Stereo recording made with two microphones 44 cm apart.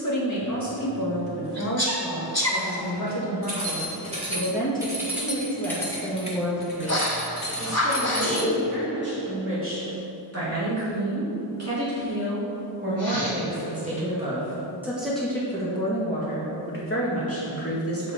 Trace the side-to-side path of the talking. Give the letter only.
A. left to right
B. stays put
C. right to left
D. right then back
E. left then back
D.